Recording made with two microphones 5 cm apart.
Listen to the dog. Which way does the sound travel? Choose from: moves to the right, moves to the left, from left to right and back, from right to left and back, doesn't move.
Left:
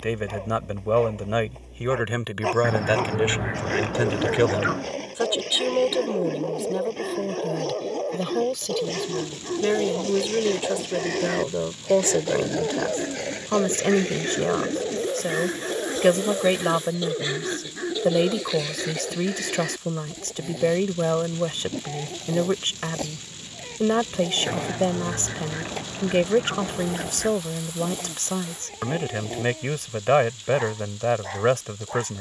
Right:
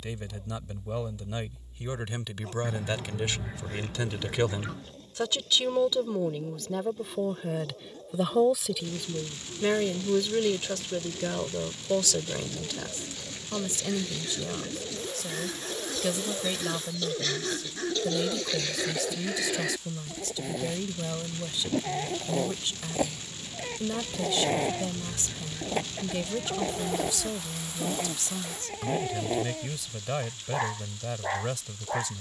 moves to the right.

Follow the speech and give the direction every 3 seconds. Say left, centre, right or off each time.
left, left, centre, centre, left, left, left, left, left, left, left.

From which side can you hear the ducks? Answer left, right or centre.
left.